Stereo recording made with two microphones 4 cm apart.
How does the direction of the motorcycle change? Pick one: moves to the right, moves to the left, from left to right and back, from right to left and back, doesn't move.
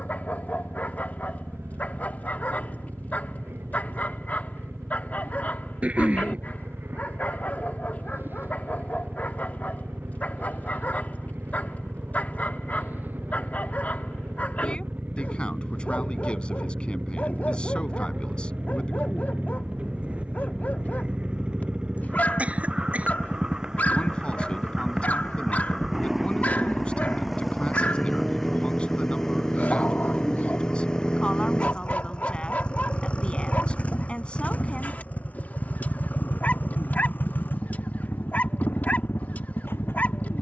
moves to the left.